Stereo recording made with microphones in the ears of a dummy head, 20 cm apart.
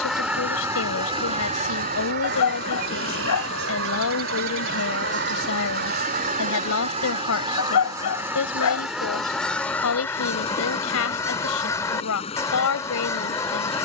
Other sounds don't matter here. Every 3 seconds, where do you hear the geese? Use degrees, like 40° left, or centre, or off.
30° right, 50° right, 20° right, 10° left, 10° left.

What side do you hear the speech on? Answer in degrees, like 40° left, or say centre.
80° left.